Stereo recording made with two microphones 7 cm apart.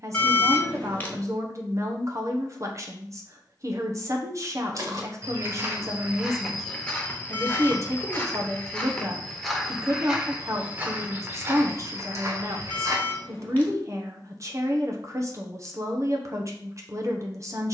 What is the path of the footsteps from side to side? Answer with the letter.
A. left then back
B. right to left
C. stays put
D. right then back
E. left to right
A.